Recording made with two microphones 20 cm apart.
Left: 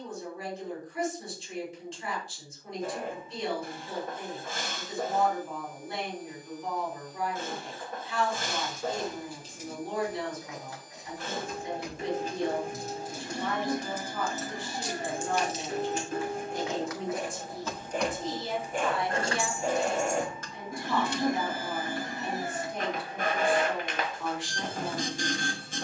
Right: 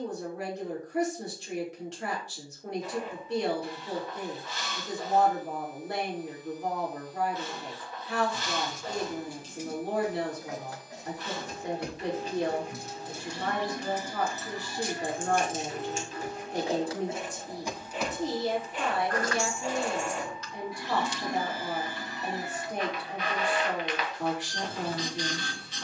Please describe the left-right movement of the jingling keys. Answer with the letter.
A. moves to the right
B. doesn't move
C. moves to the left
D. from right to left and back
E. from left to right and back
C.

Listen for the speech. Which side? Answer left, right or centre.
right.